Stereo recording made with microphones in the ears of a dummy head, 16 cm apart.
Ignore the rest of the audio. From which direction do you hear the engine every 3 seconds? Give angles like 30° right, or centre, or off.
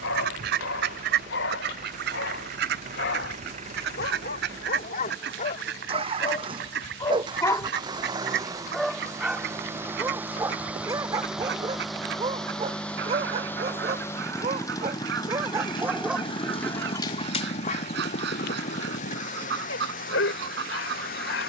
40° right, 40° right, 20° right, 10° right, 10° left, 30° left, 40° left.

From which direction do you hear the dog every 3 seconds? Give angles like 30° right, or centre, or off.
70° left, 50° left, 20° left, 20° right, 30° right, 10° left, 60° left.